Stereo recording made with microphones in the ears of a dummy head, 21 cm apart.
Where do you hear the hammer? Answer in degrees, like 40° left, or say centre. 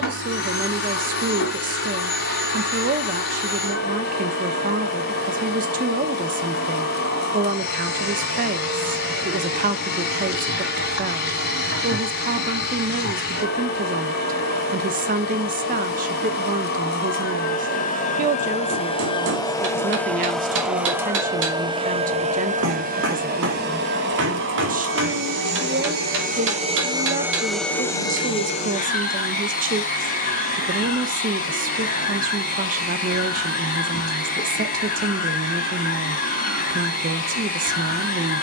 50° right.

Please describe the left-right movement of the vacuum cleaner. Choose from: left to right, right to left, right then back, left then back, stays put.
right then back.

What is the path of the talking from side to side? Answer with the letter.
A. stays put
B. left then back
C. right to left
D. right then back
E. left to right
A.